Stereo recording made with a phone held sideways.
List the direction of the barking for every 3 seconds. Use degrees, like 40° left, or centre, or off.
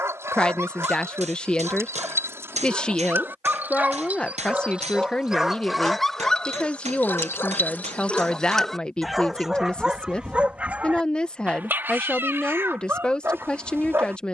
20° right, 10° right, 10° left, 10° right, 20° right.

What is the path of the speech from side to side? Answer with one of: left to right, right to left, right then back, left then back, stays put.
stays put.